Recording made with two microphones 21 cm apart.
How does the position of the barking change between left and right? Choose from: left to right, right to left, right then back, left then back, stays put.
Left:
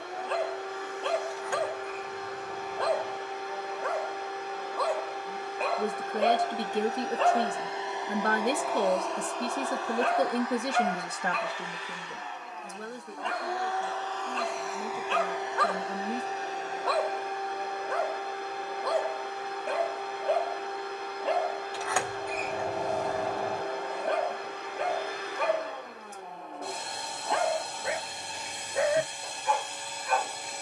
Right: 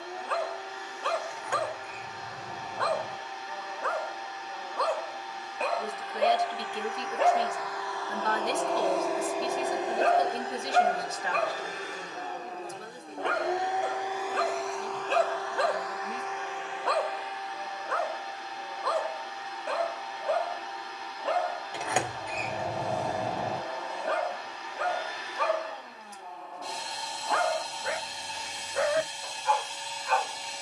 right then back.